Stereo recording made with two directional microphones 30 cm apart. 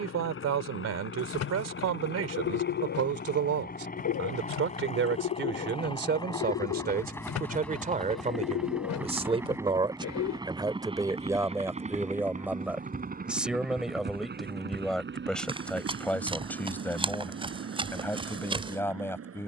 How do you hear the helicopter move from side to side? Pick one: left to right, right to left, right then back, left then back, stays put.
left to right.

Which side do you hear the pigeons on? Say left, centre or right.
left.